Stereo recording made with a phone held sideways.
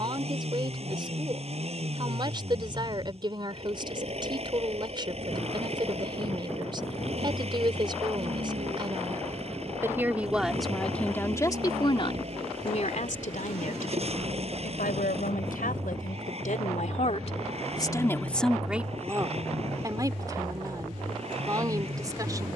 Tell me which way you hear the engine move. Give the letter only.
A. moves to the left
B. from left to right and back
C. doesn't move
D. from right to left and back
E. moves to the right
C.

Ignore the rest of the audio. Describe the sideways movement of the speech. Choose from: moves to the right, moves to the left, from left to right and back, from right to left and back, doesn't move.
from right to left and back.